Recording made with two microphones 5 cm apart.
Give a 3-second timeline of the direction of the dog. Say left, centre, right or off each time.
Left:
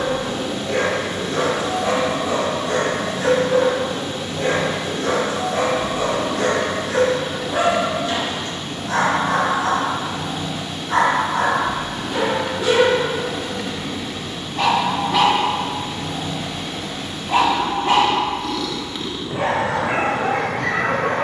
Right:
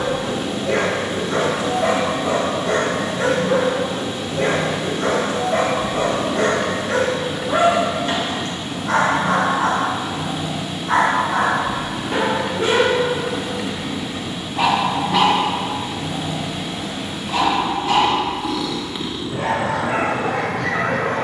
right, right, right, right, right, left, left.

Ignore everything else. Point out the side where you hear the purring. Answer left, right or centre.
centre.